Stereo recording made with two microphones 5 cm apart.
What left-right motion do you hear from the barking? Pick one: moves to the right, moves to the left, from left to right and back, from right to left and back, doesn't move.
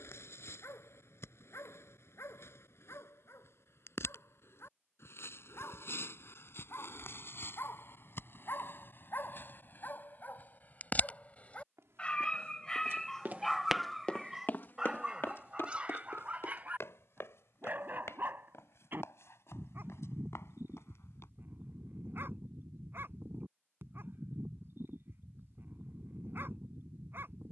moves to the right.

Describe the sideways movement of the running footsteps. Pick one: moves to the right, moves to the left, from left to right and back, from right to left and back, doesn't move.
moves to the left.